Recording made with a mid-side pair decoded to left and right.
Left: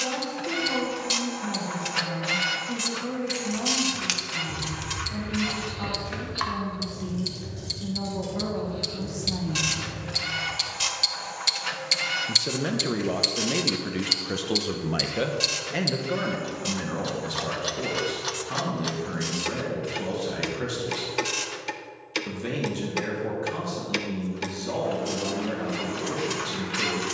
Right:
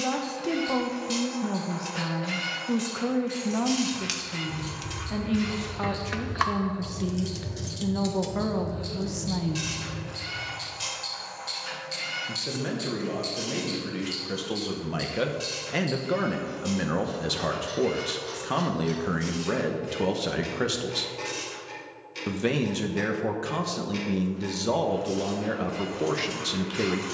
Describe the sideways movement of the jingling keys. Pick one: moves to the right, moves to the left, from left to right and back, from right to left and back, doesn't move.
from left to right and back.